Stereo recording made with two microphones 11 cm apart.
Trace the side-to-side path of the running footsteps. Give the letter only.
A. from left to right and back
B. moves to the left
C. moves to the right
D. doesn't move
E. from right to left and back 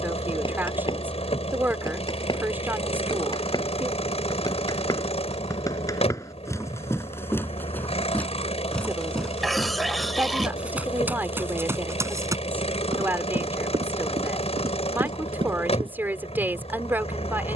C.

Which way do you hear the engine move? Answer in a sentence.
You can hear the engine stay in one place.